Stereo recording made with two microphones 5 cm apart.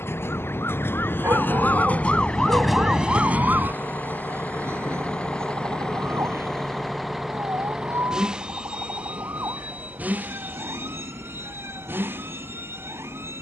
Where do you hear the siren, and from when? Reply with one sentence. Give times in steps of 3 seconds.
You can hear the siren on the left from 0 s and on the right from 3 s.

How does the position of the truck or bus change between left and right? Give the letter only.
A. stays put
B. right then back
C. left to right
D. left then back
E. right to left
C.